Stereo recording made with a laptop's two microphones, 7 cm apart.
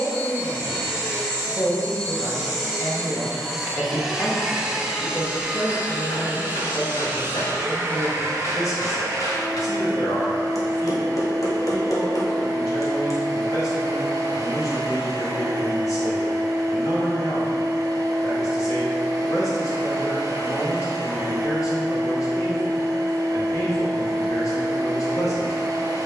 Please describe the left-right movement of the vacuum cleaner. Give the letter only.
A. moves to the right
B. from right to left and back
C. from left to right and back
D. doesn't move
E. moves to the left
A.